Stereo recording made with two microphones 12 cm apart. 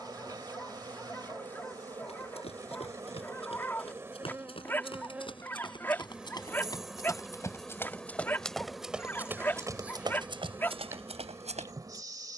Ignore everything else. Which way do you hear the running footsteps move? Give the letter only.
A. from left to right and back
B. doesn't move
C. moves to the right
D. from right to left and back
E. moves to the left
C.